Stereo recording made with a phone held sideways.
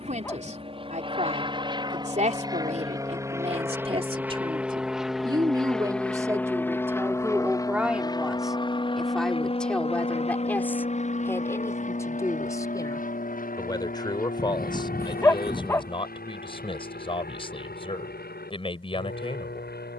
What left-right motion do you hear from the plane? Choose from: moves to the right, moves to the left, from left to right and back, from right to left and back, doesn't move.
moves to the left.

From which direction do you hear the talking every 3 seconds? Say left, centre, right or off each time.
right, right, centre, centre, left, left, left.